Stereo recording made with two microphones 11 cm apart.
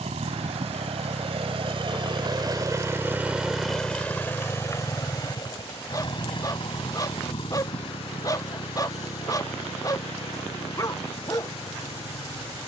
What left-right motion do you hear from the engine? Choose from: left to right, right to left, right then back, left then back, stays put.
right to left.